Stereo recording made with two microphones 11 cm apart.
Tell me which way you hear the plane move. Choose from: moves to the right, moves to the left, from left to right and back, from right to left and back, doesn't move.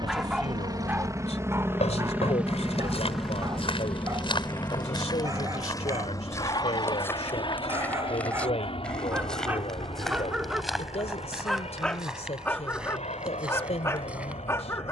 moves to the left.